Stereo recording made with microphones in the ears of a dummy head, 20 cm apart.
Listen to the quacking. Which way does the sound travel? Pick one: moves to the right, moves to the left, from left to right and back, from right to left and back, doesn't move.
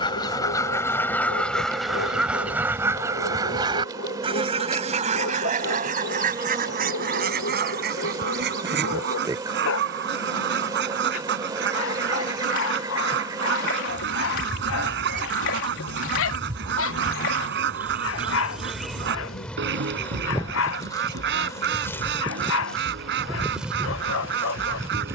moves to the right.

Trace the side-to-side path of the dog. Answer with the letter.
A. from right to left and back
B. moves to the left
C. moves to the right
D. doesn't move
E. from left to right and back
D.